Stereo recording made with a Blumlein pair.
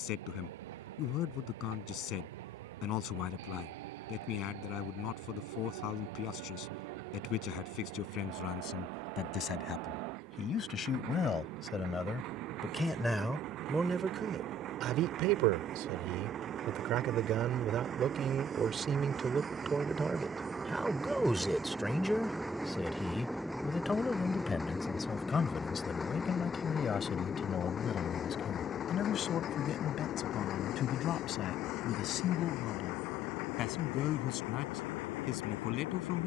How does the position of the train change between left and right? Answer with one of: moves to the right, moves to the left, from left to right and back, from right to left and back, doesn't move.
moves to the left.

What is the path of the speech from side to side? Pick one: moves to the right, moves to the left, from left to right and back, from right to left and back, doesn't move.
from left to right and back.